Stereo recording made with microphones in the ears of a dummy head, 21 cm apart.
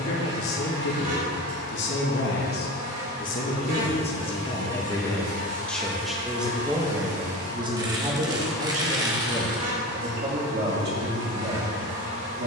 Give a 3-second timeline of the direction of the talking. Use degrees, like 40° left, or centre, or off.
50° left, 20° left, 20° right, 40° right.